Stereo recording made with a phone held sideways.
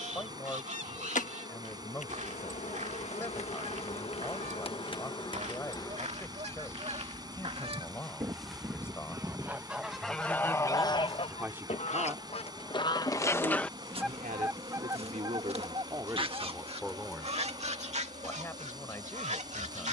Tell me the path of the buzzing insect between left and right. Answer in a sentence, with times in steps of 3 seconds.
You can hear the buzzing insect on the left from 0 s, in the centre from 6 s and on the right from 9 s.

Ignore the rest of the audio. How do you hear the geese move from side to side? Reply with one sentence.
You can hear the geese move from right to left and back again.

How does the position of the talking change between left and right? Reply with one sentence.
In this clip you hear the talking move from left to right and back again.